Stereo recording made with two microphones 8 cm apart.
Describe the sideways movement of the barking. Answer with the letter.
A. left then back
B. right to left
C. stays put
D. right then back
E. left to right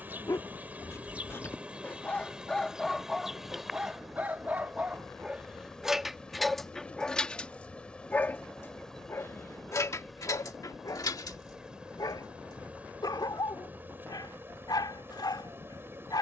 D.